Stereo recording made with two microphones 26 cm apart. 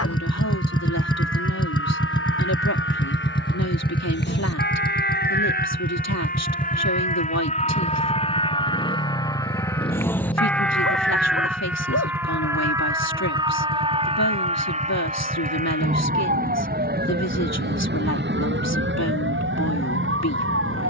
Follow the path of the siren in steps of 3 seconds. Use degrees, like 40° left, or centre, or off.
50° left, 40° left, 30° left, centre, 20° right, 30° right, 50° right.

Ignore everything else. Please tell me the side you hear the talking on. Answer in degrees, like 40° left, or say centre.
80° left.